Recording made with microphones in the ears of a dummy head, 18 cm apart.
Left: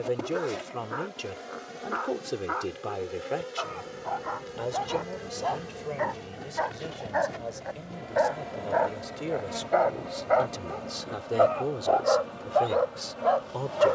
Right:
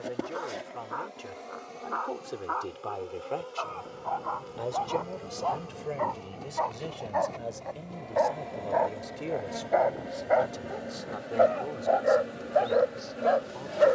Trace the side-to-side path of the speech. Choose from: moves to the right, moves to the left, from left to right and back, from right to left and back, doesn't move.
from left to right and back.